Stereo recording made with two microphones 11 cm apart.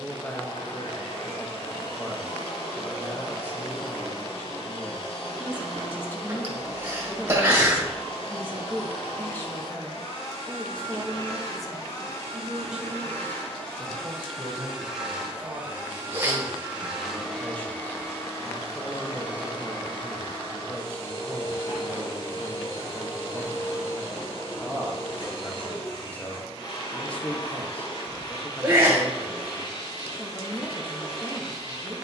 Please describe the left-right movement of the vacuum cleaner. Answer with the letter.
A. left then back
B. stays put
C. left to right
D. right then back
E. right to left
D.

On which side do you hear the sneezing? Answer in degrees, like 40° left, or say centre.
20° right.